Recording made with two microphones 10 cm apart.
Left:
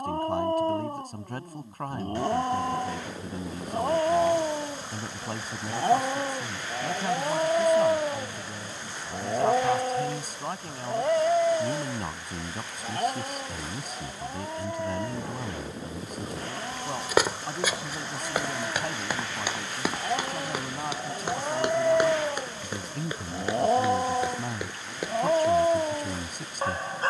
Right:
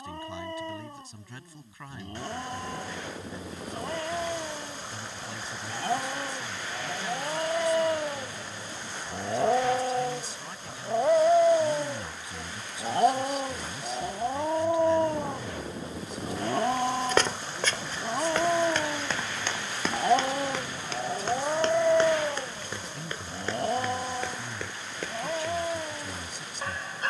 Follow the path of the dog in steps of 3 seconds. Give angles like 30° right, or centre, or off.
50° left, 40° left, 20° left, 10° right, 30° right, 50° right, 40° right, centre, 40° left.